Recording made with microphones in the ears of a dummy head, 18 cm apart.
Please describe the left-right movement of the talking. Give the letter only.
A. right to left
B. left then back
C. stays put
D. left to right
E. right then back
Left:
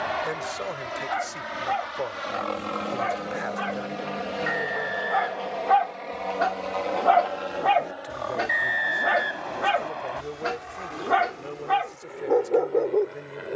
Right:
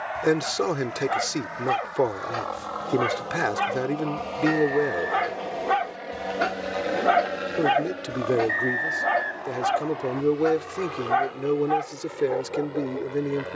C.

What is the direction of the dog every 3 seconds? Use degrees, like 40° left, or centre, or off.
60° right, 50° right, 10° right, 40° left, 70° left.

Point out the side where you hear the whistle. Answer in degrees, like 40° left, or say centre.
50° left.